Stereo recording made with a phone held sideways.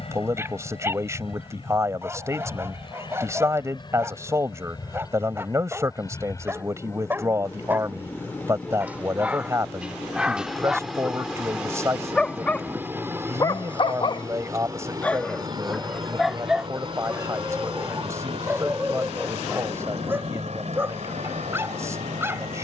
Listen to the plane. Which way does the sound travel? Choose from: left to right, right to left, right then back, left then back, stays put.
left to right.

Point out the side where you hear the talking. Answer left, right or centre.
right.